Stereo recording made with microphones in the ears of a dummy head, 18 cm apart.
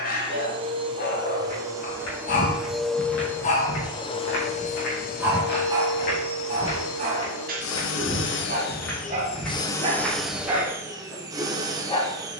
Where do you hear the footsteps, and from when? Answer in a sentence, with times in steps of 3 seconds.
You can hear the footsteps on the left from 0 s and in the centre from 9 s.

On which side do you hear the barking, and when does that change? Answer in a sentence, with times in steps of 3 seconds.
In this clip you hear the barking on the left from 0 s, in the centre from 3 s, on the right from 6 s and in the centre from 9 s.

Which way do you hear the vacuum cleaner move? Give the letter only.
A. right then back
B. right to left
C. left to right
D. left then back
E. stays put
D.